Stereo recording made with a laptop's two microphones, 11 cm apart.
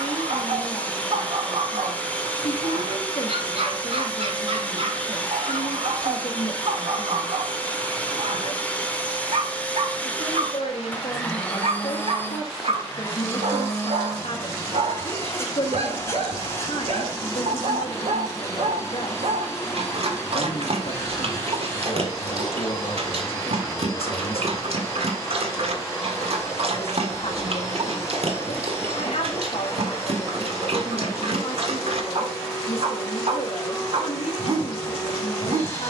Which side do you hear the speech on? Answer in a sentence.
In this clip you hear the speech on the left.